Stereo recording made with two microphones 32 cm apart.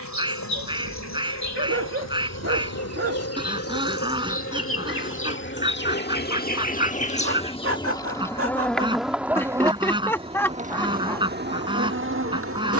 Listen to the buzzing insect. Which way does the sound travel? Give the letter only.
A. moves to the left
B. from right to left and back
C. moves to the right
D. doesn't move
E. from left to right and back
C.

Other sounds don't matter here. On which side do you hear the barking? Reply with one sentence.
In this clip you hear the barking on the right.